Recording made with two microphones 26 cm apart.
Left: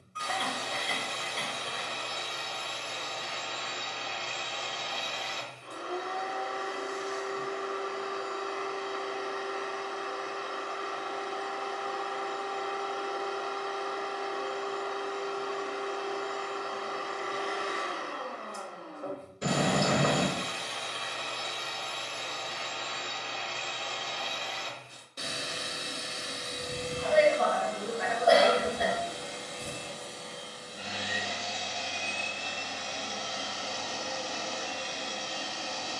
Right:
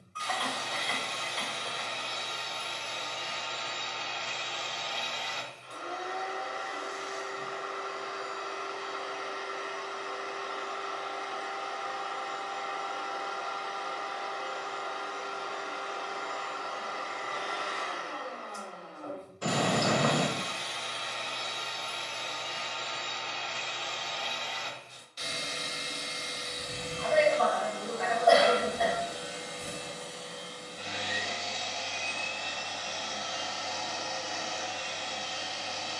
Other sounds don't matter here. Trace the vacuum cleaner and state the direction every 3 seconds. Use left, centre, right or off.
left, left, left, left, left, left, left, left, left, centre, centre, left.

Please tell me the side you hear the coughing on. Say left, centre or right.
left.